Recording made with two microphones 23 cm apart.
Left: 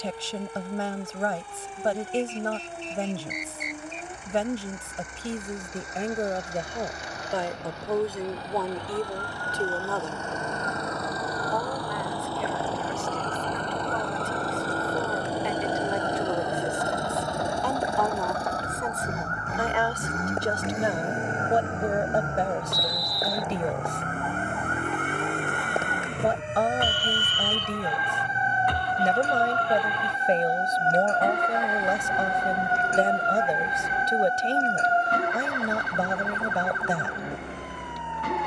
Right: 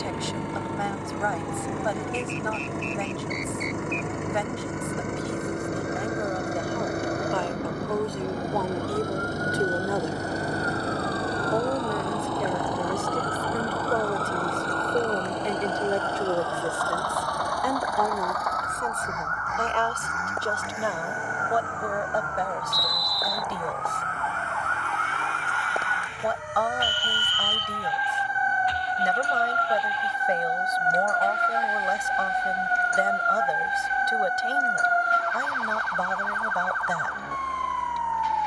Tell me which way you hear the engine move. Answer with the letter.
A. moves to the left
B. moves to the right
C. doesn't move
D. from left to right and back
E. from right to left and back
A.